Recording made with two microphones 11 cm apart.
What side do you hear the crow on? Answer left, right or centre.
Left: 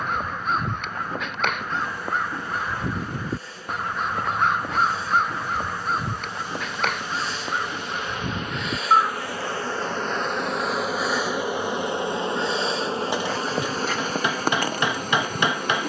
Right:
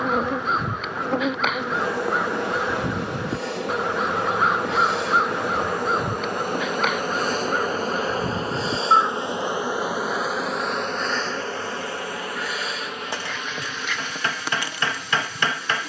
centre.